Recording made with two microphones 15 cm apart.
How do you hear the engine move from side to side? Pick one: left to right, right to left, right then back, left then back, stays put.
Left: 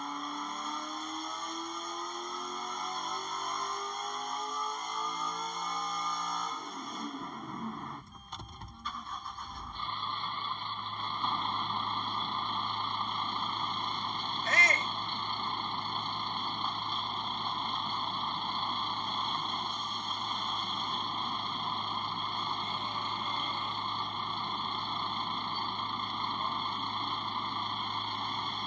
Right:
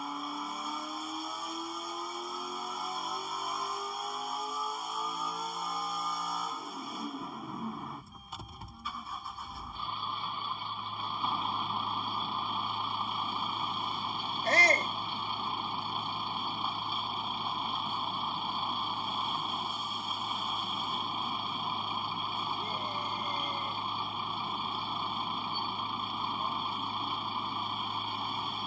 stays put.